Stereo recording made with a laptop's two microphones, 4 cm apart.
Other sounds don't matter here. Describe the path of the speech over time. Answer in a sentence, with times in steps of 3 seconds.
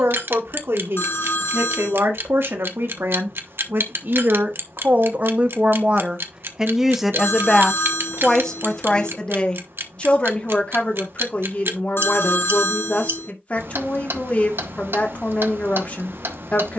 In this clip you hear the speech on the right from 0 s, in the centre from 6 s and on the left from 9 s.